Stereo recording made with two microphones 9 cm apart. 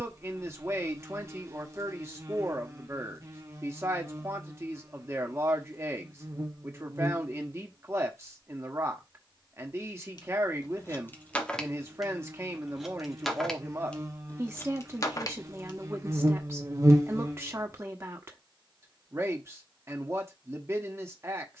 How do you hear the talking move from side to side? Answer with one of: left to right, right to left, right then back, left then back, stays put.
stays put.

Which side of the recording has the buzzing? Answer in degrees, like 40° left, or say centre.
30° right.